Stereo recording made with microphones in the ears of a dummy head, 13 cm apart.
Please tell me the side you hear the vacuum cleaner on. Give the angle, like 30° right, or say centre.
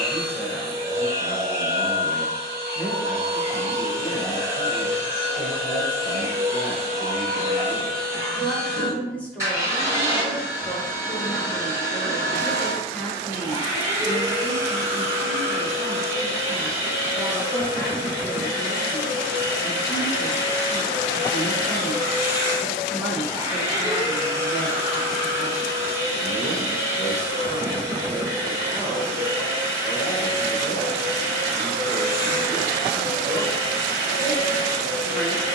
20° right.